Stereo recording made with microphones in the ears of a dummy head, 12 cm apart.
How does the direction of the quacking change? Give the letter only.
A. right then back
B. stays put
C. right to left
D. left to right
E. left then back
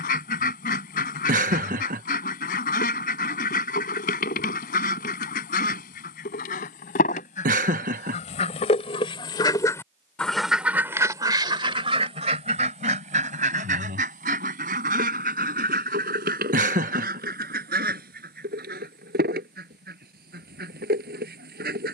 D.